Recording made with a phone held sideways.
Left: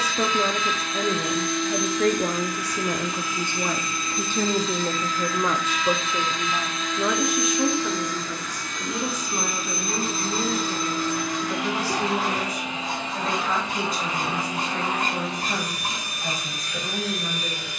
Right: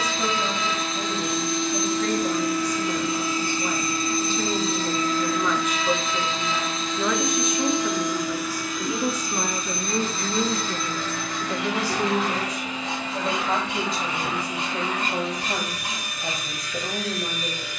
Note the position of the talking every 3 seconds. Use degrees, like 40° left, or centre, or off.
70° left, 50° left, centre, 20° right, 20° right, 30° right.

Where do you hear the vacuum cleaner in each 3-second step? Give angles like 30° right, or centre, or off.
30° right, 30° right, 20° right, 10° left, 30° left, 30° left.